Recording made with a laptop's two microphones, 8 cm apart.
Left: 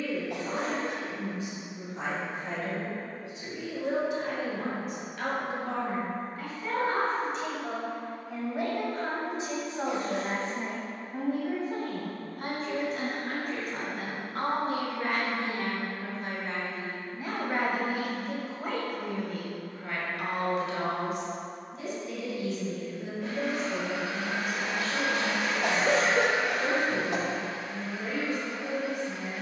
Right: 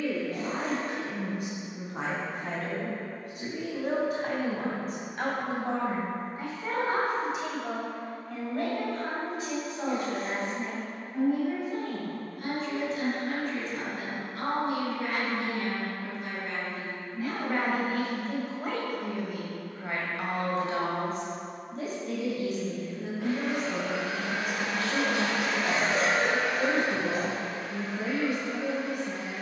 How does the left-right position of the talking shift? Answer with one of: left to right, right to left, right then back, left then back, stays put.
left then back.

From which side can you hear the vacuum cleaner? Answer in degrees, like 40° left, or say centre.
80° right.